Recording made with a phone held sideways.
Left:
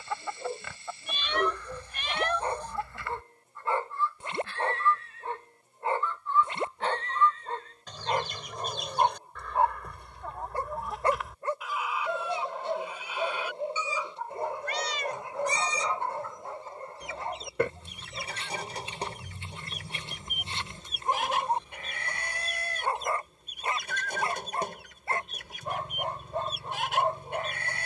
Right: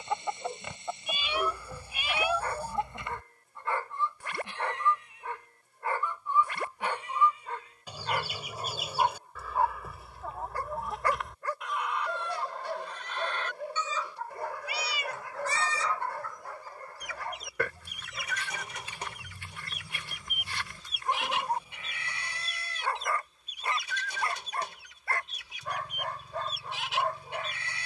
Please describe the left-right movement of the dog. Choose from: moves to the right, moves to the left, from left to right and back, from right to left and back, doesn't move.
doesn't move.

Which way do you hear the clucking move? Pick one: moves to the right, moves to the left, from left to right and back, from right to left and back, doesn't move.
moves to the left.